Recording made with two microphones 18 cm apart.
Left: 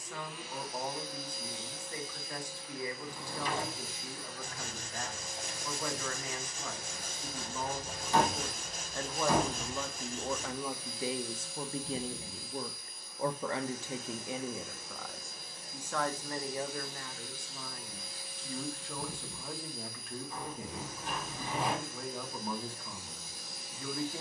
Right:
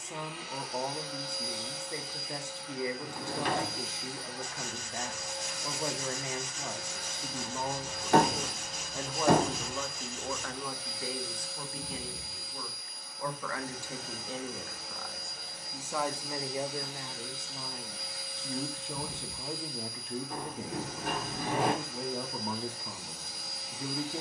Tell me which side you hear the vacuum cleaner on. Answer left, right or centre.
right.